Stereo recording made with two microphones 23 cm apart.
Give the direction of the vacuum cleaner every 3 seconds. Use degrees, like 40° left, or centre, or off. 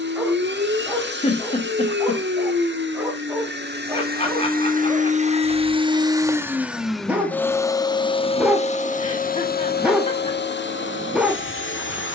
50° right, 40° right, 10° left, 50° left.